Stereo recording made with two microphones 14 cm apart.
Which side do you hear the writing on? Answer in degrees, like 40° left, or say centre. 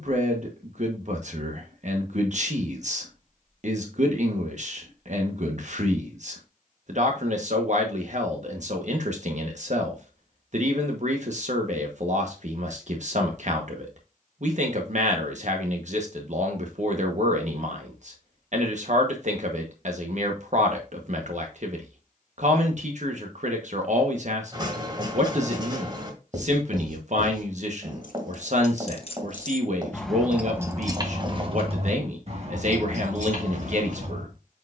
30° right.